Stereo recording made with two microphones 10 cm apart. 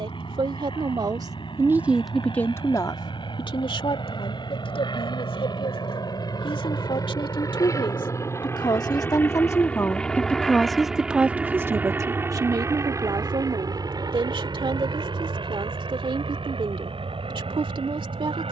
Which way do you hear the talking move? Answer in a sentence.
You can hear the talking move from right to left and back again.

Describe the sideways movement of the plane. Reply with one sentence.
In this clip you hear the plane go from the left side to the right.